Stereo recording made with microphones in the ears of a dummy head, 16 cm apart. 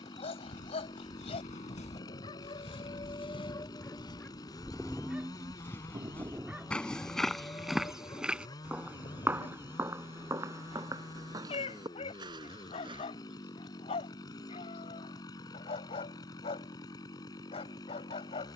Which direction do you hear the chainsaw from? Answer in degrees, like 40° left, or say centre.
20° left.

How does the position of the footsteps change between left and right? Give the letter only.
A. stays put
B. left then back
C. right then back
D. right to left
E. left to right
E.